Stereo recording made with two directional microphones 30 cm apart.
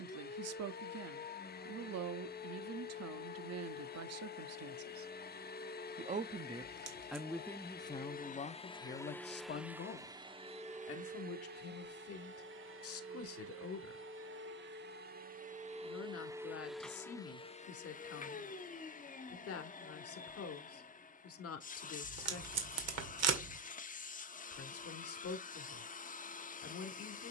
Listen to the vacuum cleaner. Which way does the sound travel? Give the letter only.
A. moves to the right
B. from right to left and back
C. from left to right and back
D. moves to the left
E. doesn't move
C.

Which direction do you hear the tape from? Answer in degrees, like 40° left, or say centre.
60° right.